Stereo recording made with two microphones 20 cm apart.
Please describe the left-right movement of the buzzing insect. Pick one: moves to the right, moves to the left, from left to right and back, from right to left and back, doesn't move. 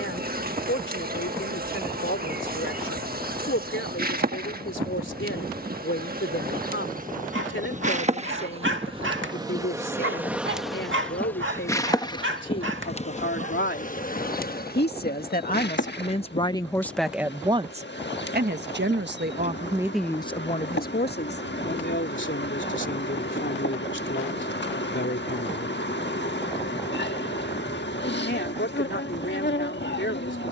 moves to the left.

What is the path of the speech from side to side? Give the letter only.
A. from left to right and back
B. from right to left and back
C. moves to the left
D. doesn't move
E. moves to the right
A.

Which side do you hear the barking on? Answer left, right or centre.
right.